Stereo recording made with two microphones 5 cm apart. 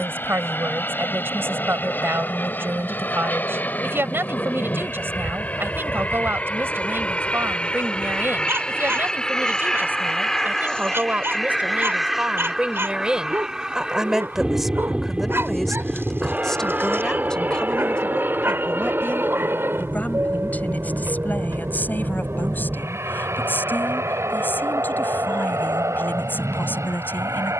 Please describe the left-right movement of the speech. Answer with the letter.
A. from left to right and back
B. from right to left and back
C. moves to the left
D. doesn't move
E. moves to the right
C.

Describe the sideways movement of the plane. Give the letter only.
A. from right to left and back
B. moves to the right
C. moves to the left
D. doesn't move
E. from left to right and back
B.